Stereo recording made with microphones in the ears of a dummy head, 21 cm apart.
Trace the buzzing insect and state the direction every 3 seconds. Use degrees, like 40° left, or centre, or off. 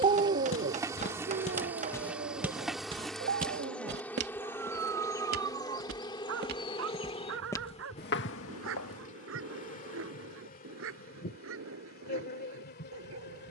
10° right, 10° left, 30° left, 40° left, 40° left.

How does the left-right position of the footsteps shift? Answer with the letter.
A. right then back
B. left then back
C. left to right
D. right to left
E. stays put
A.